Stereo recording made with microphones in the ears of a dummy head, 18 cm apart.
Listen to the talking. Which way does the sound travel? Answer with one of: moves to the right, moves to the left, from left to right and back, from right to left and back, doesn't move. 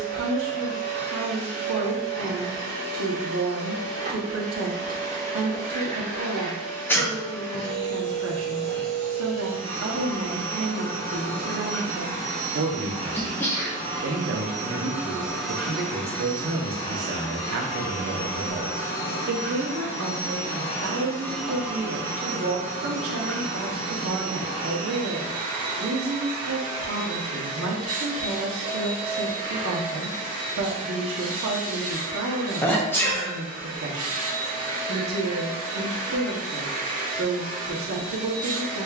doesn't move.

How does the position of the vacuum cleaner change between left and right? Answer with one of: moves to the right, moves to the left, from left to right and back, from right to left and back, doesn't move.
from right to left and back.